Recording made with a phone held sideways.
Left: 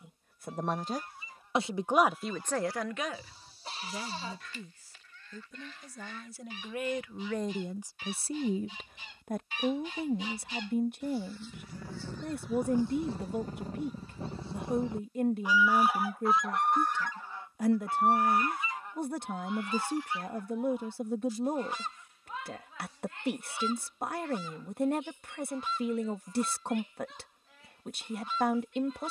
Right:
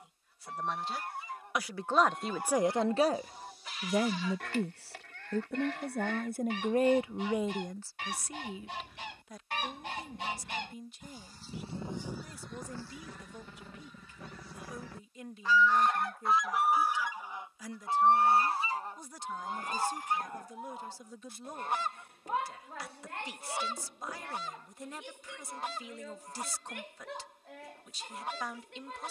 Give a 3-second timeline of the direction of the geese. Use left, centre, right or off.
right, right, right, right, left, centre, right, right, right, right.